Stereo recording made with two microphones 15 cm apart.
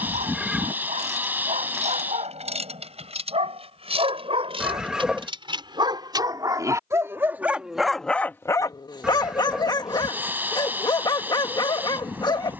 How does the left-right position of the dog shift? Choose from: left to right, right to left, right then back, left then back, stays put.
right to left.